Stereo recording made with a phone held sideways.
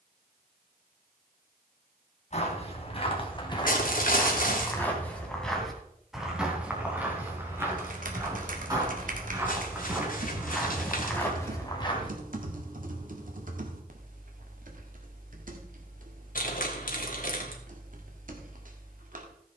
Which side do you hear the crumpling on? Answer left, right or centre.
left.